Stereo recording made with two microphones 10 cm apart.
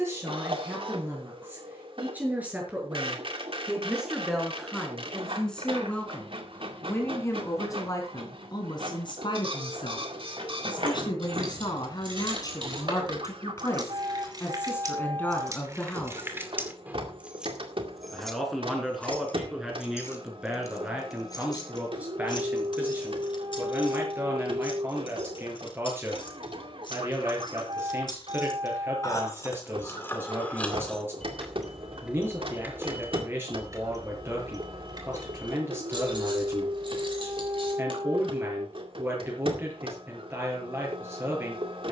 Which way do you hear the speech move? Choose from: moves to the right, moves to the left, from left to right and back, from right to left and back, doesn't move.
from right to left and back.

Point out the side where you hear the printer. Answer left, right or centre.
right.